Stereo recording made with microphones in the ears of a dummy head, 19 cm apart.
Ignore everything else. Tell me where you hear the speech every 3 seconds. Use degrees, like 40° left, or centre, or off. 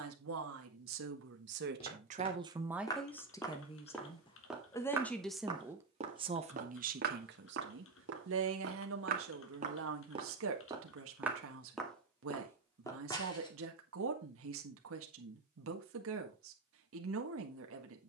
50° right, 10° left, 50° right, 70° right, 70° right, 70° right.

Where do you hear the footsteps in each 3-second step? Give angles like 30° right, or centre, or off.
20° left, centre, 50° right, 20° right, 20° left, off.